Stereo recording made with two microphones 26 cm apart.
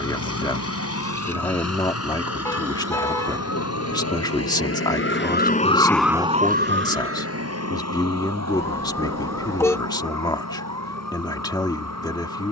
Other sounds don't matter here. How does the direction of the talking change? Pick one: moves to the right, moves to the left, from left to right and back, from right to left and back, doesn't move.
doesn't move.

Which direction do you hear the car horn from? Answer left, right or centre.
centre.